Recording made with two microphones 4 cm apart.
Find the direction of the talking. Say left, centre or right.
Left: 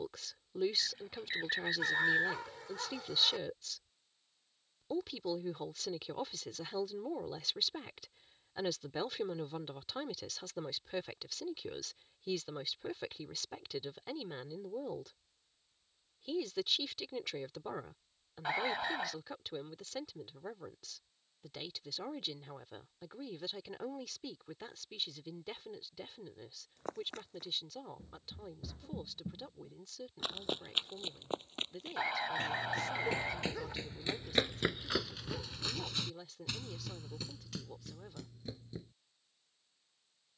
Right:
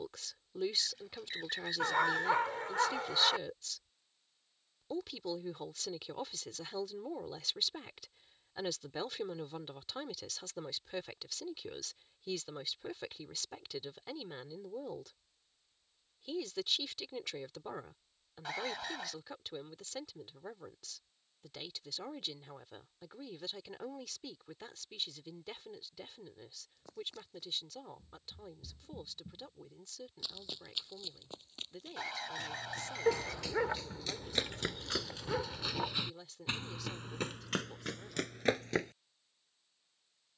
centre.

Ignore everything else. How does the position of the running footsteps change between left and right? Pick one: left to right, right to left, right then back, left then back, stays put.
left to right.